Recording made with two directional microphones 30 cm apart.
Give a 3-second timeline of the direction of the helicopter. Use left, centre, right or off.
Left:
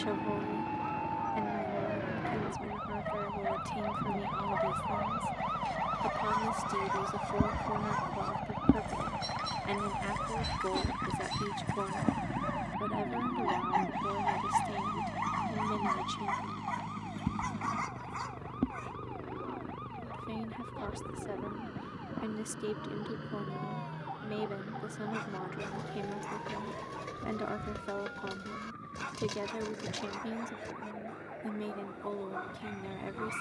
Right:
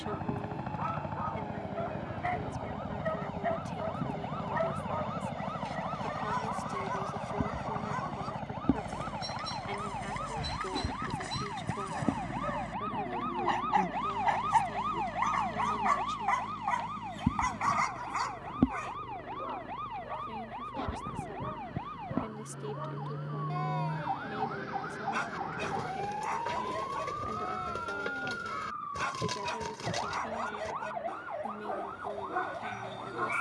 right, right, centre, centre, left, left, left, left, left, left, left.